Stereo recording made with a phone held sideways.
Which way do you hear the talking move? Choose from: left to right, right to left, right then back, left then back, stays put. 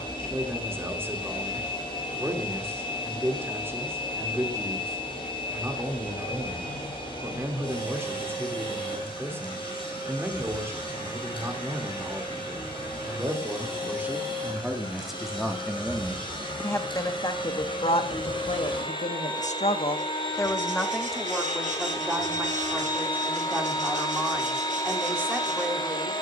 left then back.